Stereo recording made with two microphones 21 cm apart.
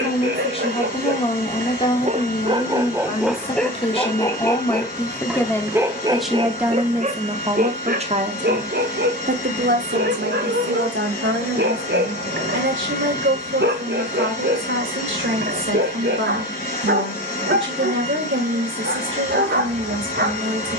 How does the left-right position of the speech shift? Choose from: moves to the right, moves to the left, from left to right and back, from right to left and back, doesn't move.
moves to the right.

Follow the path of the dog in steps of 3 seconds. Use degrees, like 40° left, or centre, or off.
40° right, centre, 40° right, 60° right, 60° right, 60° right, 60° right.